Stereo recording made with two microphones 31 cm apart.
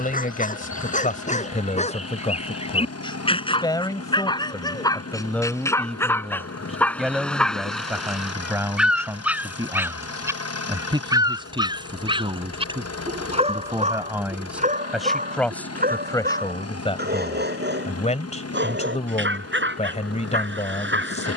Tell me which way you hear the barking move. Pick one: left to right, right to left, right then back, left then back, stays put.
left to right.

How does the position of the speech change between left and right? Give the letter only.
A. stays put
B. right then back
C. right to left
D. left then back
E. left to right
B.